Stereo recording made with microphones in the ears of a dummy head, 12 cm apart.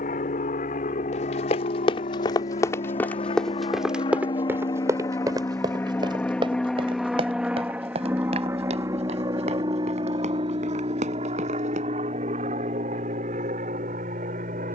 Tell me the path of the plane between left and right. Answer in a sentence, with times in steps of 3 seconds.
In this clip you hear the plane on the left from 0 s, in the centre from 6 s and on the right from 9 s.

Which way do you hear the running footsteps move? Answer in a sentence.
In this clip you hear the running footsteps go from the left side to the right.